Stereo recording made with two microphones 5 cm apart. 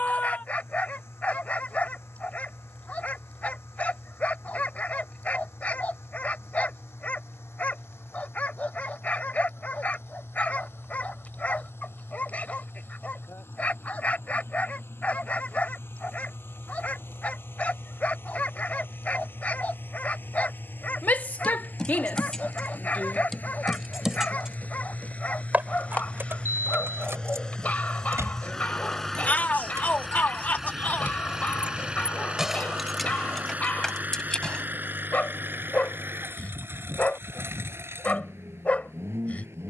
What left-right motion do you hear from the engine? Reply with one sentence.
In this clip you hear the engine move to the right.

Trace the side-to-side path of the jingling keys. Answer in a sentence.
In this clip you hear the jingling keys go right and come back.